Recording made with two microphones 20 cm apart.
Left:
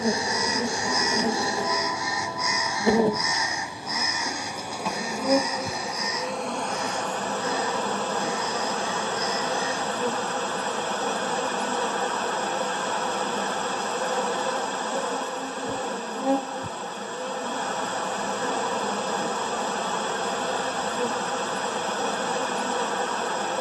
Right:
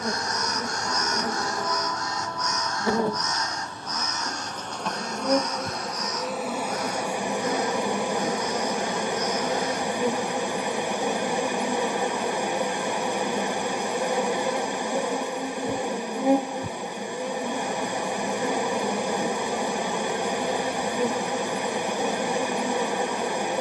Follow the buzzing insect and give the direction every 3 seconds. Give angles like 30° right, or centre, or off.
20° left, 10° left, 10° right, 10° right, 10° right, 10° right, 10° right, 10° right.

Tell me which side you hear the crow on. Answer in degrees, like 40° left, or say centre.
10° left.